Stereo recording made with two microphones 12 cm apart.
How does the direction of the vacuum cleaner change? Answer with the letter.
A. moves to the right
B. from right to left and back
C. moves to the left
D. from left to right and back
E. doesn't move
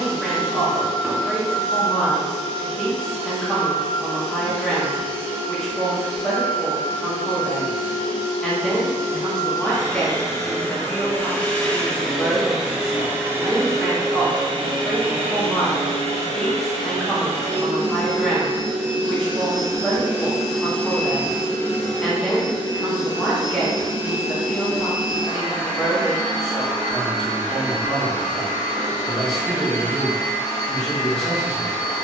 D.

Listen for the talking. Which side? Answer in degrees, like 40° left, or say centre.
centre.